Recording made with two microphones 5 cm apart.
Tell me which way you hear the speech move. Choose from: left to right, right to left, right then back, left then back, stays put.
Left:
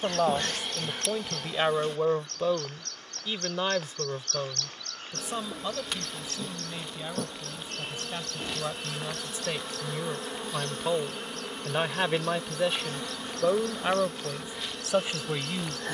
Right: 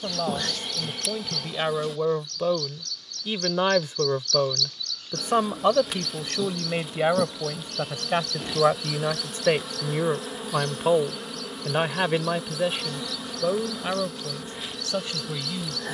right then back.